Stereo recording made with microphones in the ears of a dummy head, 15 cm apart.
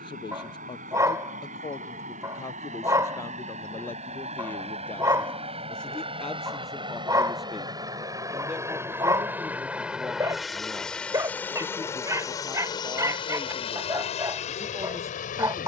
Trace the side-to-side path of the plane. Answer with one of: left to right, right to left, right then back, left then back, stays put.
right to left.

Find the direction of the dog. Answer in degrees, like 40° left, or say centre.
20° right.